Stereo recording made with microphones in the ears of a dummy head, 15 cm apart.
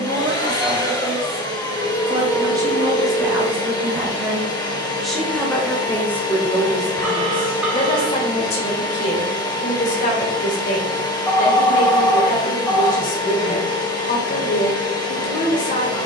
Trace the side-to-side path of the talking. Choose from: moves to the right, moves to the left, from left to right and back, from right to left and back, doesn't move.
moves to the left.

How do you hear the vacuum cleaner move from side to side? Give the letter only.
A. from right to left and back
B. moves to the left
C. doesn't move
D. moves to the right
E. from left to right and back
C.